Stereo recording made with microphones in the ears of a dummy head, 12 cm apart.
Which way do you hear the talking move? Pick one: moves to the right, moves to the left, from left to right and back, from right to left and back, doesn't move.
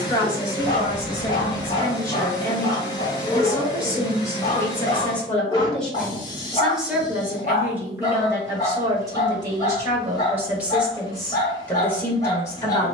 from left to right and back.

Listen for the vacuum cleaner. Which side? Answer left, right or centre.
left.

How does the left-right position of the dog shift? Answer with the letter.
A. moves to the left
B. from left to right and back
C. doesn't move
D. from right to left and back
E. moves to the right
C.